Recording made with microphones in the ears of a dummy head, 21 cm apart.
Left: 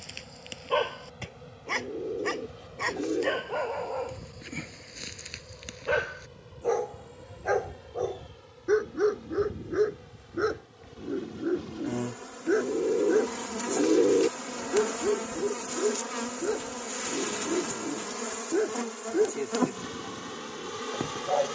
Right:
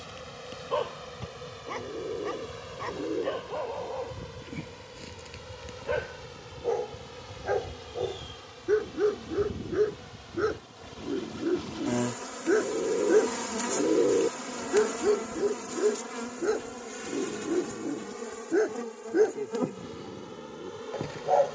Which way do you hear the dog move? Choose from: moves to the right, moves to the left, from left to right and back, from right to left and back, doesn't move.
moves to the right.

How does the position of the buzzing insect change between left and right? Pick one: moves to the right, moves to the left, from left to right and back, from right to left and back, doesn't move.
moves to the left.